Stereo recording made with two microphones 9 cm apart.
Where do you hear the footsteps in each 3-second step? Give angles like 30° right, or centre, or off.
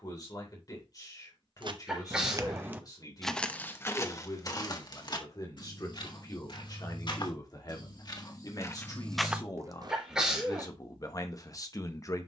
40° right, 40° left, 50° left, 30° right.